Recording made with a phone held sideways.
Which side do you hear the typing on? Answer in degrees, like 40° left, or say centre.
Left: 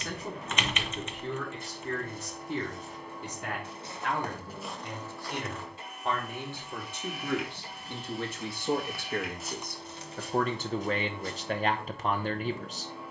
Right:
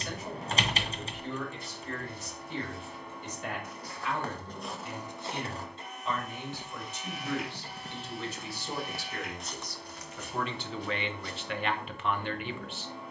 30° right.